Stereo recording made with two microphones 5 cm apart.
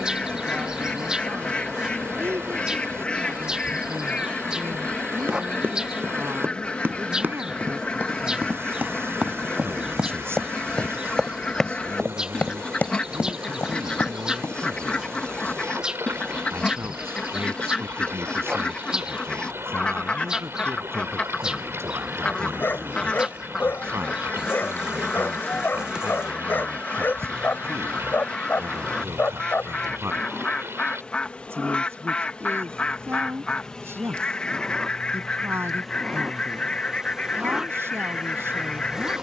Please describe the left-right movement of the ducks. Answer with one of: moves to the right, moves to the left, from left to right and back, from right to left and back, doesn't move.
doesn't move.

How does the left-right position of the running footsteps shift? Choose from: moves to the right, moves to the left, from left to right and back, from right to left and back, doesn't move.
moves to the left.